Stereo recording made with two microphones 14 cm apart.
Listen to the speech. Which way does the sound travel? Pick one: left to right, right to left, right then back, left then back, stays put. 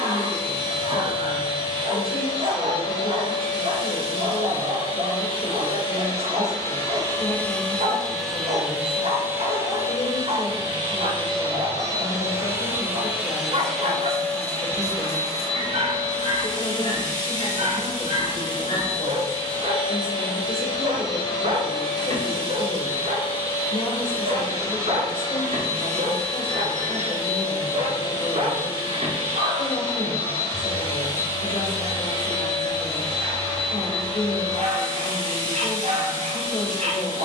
stays put.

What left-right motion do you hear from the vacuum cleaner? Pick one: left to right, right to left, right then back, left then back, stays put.
right then back.